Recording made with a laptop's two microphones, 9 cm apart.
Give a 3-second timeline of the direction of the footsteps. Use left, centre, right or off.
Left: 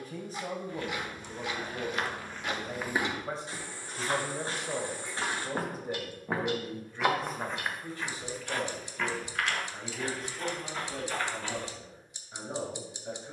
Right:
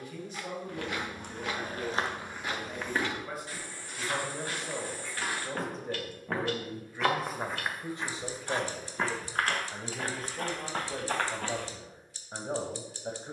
right, left, centre, right, off.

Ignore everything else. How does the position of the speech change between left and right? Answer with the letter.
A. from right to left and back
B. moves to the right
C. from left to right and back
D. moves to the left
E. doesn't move
B.